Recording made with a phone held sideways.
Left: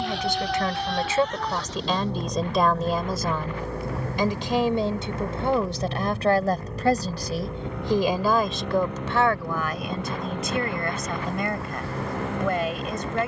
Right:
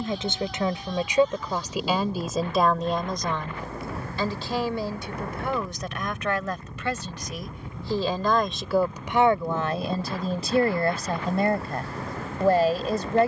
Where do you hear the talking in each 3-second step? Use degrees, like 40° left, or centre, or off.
10° right, 20° left, 20° left, 30° right, 30° right.